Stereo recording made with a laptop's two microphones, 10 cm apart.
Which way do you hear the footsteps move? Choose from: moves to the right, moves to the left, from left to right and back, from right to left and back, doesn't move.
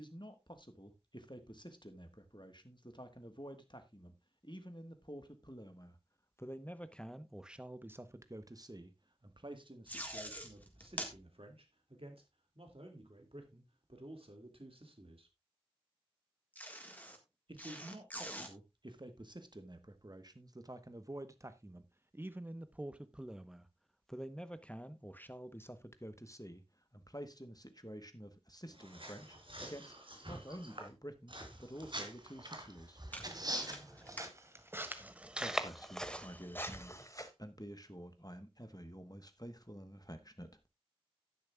moves to the left.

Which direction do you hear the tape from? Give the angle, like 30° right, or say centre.
20° left.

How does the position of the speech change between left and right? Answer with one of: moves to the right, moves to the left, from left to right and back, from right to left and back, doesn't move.
from left to right and back.